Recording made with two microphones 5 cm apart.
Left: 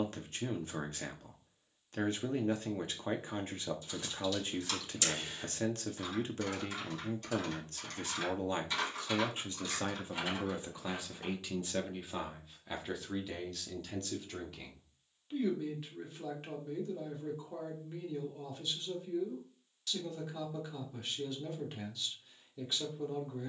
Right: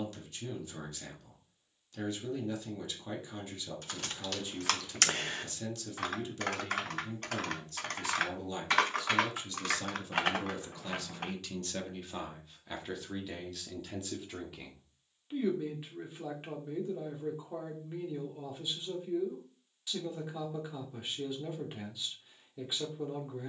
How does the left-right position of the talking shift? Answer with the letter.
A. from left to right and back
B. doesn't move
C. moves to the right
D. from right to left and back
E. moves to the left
C.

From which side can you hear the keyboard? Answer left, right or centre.
right.